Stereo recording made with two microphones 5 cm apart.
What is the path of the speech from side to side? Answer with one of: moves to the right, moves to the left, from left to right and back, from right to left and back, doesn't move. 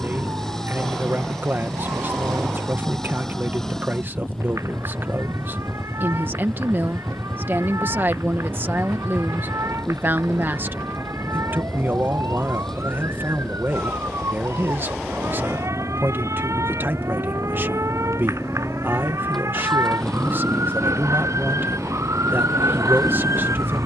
doesn't move.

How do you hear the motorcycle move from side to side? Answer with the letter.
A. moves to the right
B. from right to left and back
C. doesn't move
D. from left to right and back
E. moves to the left
C.